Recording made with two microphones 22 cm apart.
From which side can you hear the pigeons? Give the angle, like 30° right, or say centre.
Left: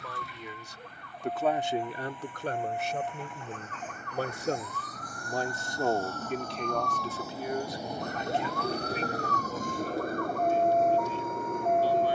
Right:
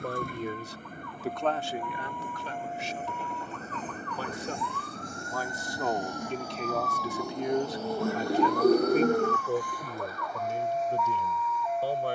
50° right.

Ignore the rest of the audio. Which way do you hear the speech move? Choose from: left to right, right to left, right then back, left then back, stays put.
left then back.